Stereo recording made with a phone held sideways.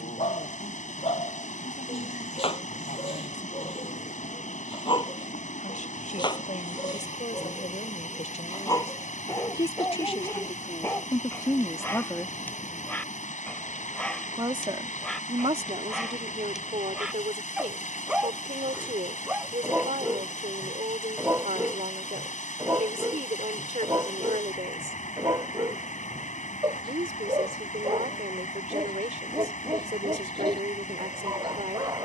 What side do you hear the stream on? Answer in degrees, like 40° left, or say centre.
70° left.